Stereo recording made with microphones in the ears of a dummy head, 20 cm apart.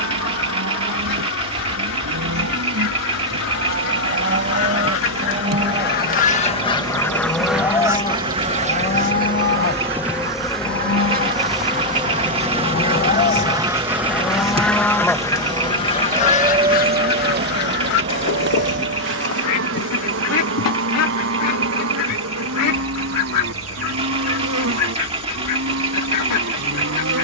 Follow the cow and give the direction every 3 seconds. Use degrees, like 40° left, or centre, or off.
60° right, 40° right, 10° left, 50° left, 30° left, 20° right, 50° right, 60° right, 60° right.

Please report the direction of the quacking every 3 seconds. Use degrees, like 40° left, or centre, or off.
80° left, 60° left, centre, 40° right, 10° right, 30° left, 60° left, 80° left, 80° left.